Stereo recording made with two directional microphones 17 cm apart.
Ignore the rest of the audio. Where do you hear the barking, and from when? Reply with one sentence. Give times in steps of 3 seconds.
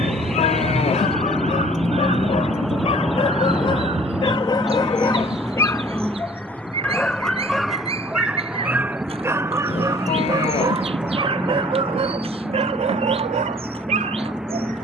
In this clip you hear the barking on the left from 0 s, in the centre from 6 s and on the right from 9 s.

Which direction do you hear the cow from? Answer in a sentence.
In this clip you hear the cow on the left.